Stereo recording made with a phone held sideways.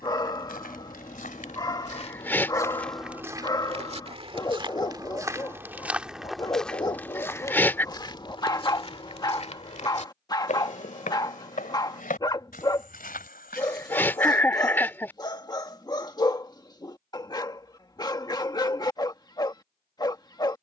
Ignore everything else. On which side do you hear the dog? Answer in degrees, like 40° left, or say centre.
20° left.